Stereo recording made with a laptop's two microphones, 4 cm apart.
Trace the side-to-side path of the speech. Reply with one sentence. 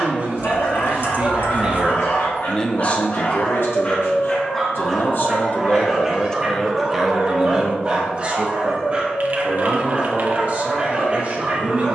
You can hear the speech go left and come back.